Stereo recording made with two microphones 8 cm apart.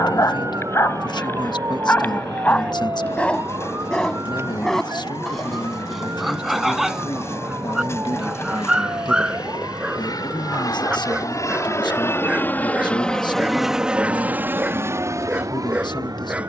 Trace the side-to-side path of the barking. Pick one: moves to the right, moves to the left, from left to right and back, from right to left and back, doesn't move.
moves to the right.